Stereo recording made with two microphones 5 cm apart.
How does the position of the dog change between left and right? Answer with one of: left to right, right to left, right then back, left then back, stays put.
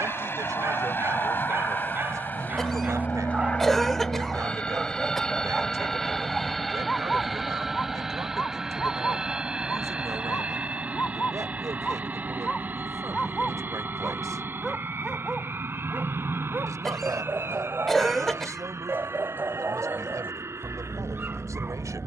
left then back.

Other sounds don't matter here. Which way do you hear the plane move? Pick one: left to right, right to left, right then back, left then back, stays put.
left to right.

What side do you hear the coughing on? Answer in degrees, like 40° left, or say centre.
10° left.